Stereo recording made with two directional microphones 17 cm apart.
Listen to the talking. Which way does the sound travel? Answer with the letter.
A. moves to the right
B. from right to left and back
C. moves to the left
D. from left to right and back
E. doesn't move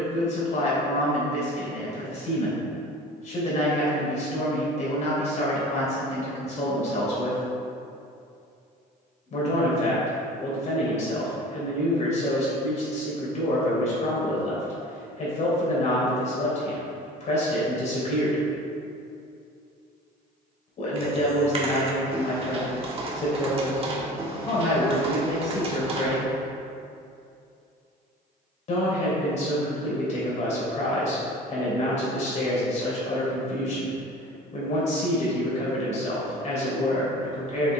E.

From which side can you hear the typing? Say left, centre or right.
right.